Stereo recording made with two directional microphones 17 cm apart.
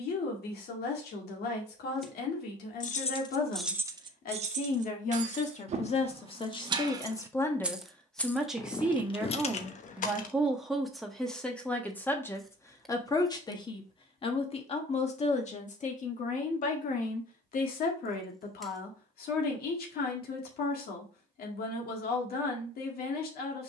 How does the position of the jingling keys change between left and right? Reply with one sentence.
You can hear the jingling keys go right and come back.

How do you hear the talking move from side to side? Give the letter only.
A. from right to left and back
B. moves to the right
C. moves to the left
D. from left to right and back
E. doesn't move
D.